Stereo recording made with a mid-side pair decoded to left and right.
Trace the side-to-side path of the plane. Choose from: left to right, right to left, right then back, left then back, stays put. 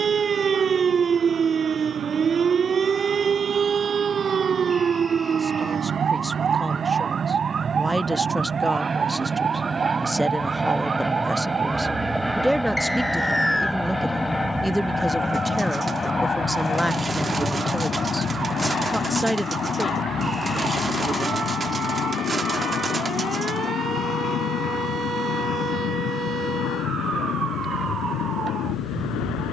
right to left.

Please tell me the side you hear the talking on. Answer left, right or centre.
centre.